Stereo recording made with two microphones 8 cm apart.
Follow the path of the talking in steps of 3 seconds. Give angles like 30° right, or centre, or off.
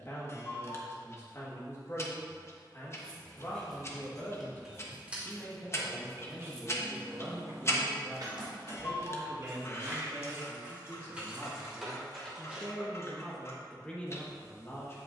40° left, 30° left, centre, 30° right, 10° left.